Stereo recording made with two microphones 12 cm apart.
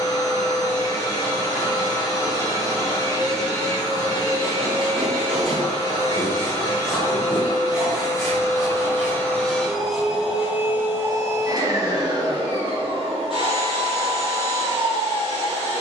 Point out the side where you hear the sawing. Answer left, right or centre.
centre.